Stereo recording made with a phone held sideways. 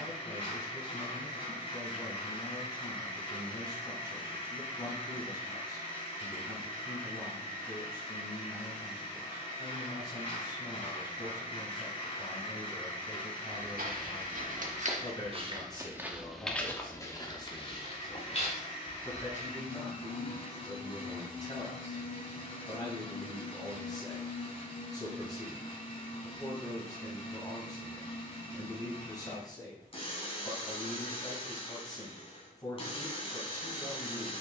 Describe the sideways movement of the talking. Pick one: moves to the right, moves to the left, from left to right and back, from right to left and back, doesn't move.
doesn't move.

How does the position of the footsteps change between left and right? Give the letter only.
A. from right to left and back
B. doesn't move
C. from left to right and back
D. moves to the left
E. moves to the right
D.